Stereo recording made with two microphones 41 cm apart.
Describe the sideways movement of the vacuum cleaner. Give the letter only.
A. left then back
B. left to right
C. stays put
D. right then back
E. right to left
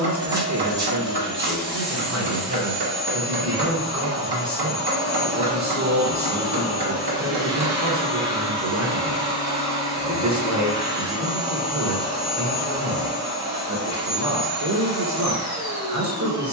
C.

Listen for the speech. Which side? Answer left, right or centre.
right.